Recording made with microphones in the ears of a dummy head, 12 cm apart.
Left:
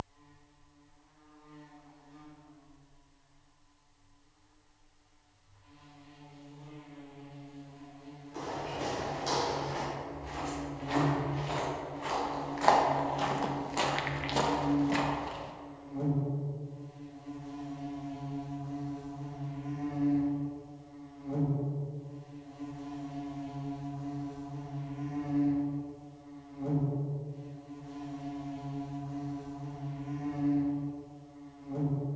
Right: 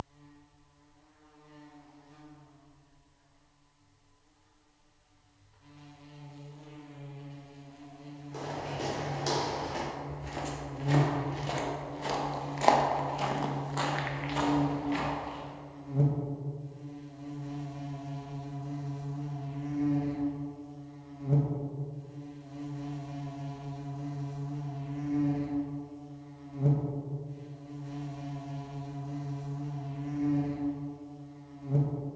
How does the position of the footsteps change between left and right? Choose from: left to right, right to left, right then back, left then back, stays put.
right to left.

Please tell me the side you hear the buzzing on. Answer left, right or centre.
right.